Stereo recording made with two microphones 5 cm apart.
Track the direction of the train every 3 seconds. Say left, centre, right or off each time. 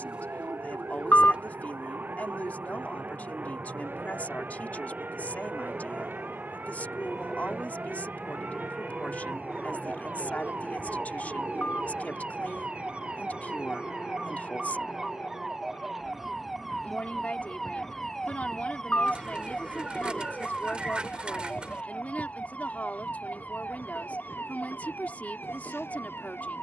right, right, centre, centre, left, left, left, left, left.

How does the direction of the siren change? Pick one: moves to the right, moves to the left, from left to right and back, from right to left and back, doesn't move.
moves to the left.